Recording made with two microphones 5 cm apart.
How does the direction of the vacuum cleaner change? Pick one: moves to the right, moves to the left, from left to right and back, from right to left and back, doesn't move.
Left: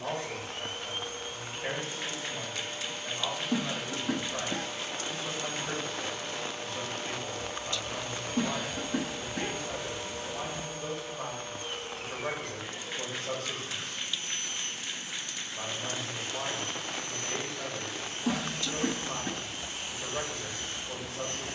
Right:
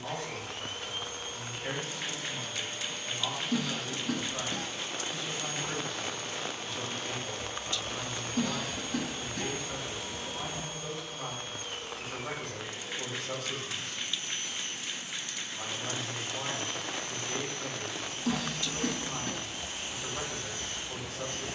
doesn't move.